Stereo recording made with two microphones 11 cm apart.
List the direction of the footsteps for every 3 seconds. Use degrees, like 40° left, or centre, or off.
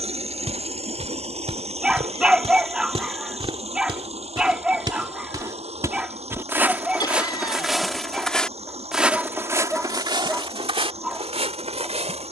70° right, 40° right, 10° right, 50° right.